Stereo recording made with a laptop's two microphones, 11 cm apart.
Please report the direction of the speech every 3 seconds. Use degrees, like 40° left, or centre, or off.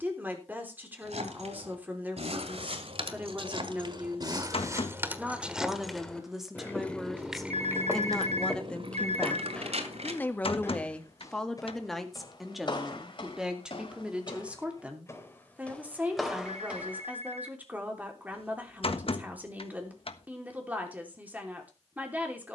20° right, 10° right, centre, 10° left, 10° right, 10° right, 10° right, 10° right.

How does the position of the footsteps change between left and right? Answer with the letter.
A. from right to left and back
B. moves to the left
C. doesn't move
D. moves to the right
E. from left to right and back
A.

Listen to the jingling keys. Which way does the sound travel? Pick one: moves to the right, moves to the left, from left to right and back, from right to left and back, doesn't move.
from right to left and back.